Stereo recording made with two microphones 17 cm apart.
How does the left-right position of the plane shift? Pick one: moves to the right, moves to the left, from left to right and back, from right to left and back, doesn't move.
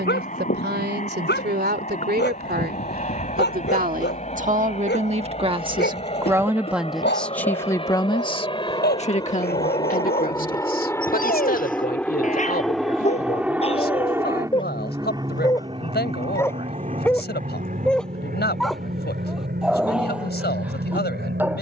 moves to the right.